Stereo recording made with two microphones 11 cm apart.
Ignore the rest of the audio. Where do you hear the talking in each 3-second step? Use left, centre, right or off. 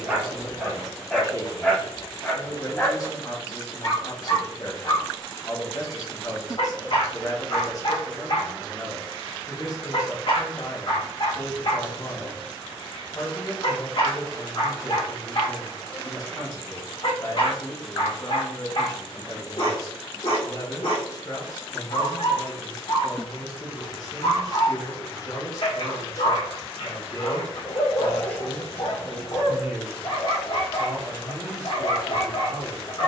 left, left, left, left, left, left, left, left, left, centre, right.